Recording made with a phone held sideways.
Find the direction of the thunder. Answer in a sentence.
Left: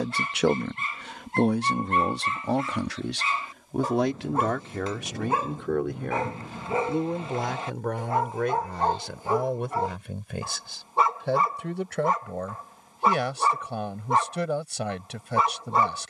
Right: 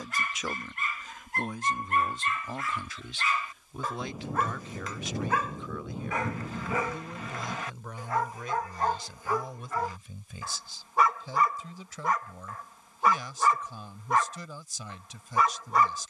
In this clip you hear the thunder in the centre.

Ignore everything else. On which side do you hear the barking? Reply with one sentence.
You can hear the barking on the left.